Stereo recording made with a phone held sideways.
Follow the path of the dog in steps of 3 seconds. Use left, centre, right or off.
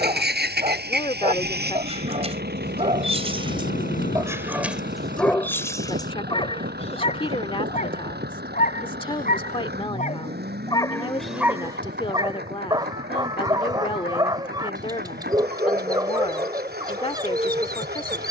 right, centre, left, left, right, right.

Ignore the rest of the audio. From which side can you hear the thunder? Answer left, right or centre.
left.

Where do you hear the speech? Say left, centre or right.
left.